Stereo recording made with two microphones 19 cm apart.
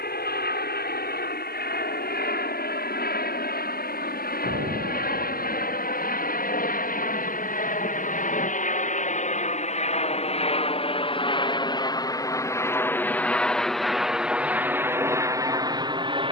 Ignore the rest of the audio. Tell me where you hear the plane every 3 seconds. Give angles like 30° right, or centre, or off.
70° left, 60° left, 60° left, 40° left, centre, 20° right.